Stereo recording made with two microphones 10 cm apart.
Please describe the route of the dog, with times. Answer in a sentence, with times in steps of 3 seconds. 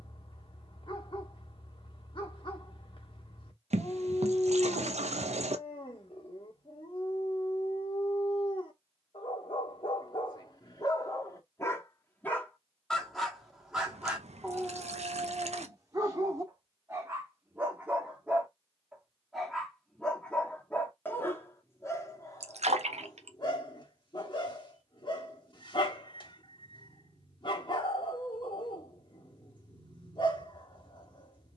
In this clip you hear the dog on the left from 0 s, in the centre from 12 s, on the right from 15 s, in the centre from 18 s and on the left from 21 s.